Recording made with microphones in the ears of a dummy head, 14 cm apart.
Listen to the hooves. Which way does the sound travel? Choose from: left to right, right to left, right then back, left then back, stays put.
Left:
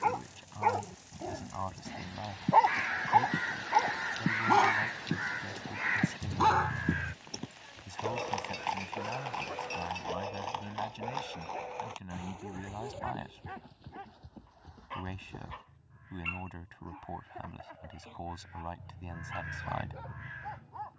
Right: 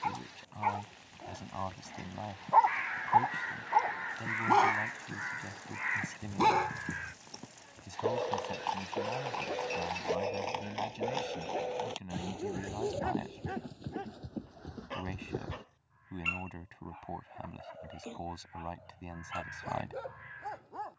left to right.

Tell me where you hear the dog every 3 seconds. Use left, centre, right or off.
left, centre, right, right, right, right, right.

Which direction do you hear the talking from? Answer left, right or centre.
centre.